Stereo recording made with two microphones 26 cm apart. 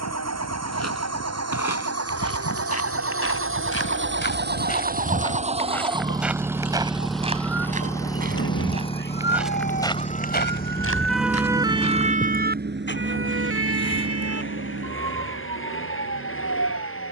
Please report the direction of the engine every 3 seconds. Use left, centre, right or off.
right, right, centre, left, left, left.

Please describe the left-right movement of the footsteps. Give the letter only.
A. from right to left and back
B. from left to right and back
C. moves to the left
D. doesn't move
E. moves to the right
B.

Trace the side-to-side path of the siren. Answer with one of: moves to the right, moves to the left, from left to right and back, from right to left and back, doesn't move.
moves to the right.